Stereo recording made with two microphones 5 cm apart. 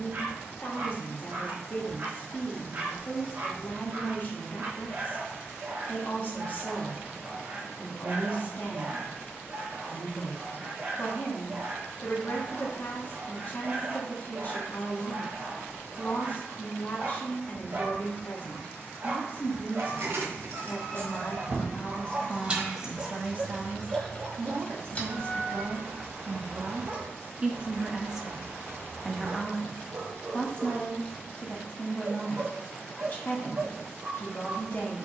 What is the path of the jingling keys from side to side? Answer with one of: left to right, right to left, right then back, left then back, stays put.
right to left.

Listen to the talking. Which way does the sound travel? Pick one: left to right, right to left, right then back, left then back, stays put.
right then back.